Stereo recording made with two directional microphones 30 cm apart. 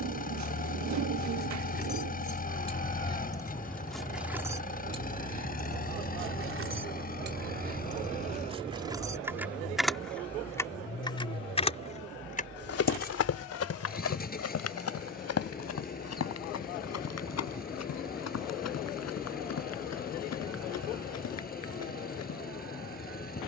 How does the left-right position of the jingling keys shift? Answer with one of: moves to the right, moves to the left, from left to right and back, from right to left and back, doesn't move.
from left to right and back.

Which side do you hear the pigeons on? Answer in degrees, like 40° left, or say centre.
70° right.